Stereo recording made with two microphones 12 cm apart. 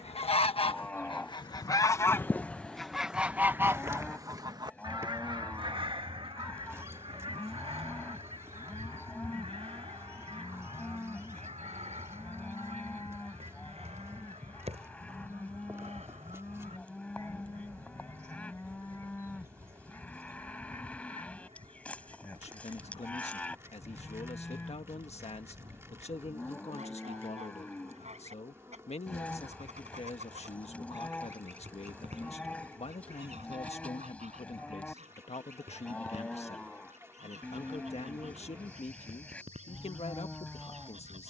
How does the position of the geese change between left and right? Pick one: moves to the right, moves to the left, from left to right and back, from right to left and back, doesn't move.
moves to the right.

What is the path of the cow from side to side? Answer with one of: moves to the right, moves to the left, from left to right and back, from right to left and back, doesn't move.
doesn't move.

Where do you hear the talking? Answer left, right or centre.
left.